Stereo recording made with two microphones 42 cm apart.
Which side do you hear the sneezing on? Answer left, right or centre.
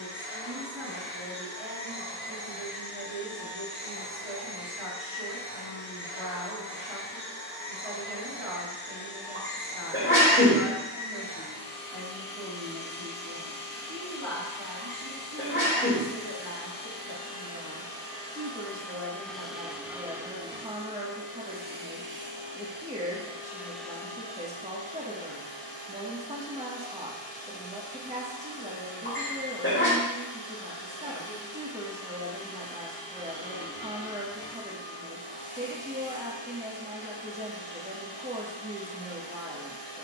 left.